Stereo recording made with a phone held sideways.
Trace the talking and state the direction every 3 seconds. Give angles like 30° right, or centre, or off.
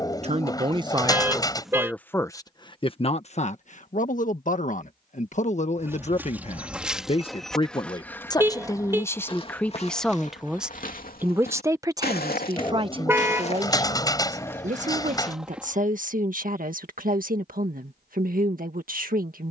10° right, 50° left, 30° left, centre, 30° right, 60° right, 60° right.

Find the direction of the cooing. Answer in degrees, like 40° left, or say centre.
20° left.